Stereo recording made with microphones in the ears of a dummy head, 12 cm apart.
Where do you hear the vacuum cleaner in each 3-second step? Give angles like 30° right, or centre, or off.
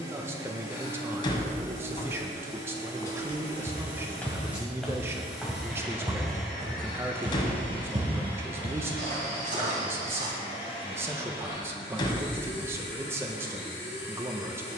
20° right, 10° right, 10° left, 30° left, 40° left.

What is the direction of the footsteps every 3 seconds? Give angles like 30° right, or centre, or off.
off, 10° left, 40° right, 70° right, off.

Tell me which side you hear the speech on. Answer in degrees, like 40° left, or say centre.
20° right.